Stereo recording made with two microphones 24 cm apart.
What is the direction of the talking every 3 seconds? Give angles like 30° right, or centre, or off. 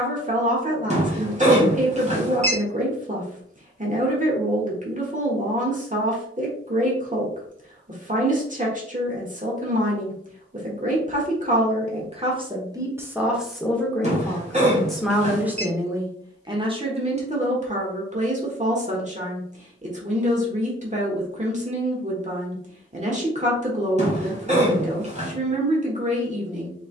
30° right, 30° right, 30° right, 30° right, 10° right, 20° right, 30° right, 30° right, 30° right.